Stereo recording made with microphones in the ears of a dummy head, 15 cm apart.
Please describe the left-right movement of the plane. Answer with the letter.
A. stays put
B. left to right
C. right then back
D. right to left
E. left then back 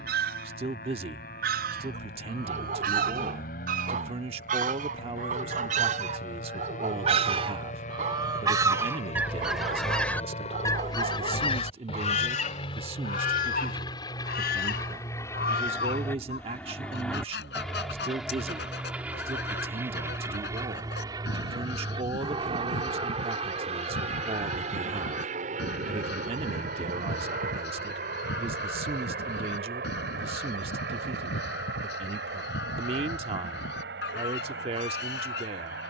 B.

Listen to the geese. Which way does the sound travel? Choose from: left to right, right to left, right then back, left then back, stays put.
right to left.